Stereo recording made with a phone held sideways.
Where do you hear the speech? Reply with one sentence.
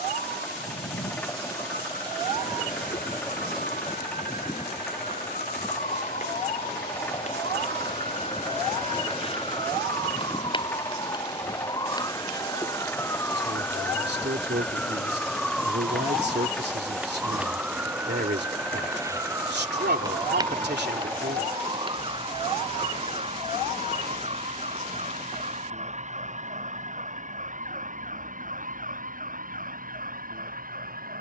You can hear the speech on the right.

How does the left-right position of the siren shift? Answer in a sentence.
In this clip you hear the siren go from the left side to the right.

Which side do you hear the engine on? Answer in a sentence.
In this clip you hear the engine in the centre.